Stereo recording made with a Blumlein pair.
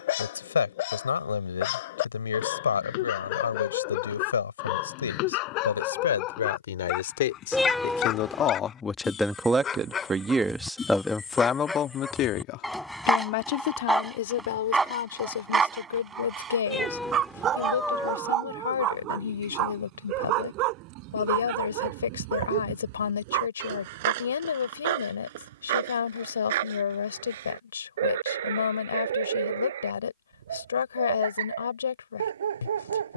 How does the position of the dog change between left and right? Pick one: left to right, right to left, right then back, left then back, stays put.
left to right.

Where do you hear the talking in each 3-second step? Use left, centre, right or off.
left, left, left, centre, left, left, left, left, left, left, left.